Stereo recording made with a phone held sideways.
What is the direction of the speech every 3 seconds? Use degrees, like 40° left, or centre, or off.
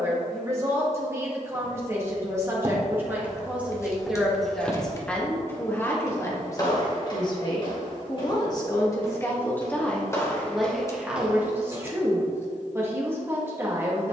20° right, centre, 30° left, centre, 20° right.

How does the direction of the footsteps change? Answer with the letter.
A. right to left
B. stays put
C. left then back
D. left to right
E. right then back
C.